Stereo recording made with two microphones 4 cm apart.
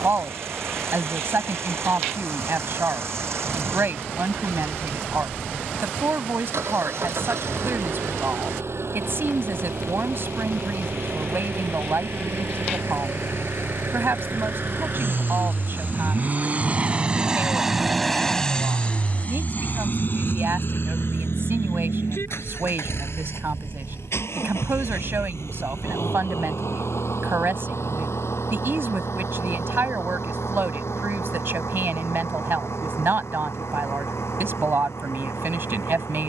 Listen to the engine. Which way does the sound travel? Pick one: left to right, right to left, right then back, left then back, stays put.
right to left.